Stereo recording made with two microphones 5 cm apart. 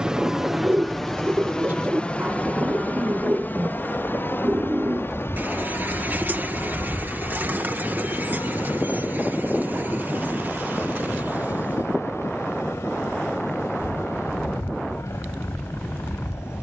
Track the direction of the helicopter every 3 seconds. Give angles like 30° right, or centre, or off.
10° left, 40° left, 50° left, 60° left, 60° left, 60° left.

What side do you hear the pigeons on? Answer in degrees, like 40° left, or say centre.
40° right.